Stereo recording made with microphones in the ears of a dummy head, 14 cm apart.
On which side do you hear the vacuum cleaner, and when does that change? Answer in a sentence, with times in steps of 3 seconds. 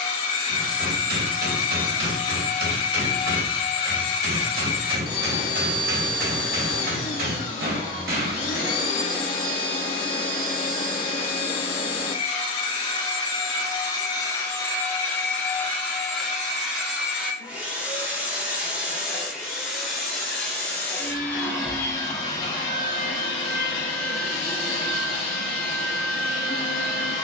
In this clip you hear the vacuum cleaner on the left from 0 s, in the centre from 15 s and on the left from 21 s.